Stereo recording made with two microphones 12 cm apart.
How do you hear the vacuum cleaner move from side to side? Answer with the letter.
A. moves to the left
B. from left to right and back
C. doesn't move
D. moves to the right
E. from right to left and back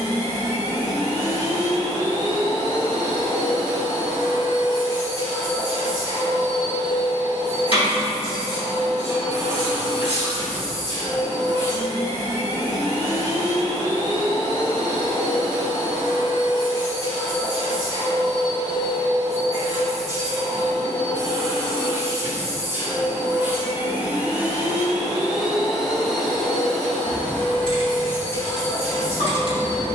A.